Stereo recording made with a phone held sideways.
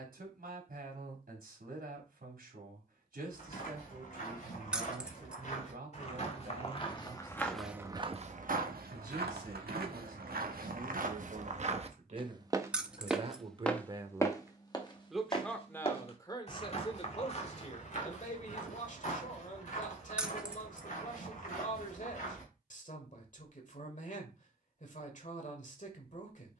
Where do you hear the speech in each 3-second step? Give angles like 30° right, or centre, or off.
70° right, 70° right, 70° right, 60° right, 30° right, 30° left, 50° left, 50° left, 50° left.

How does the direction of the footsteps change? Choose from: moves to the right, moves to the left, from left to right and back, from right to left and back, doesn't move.
from left to right and back.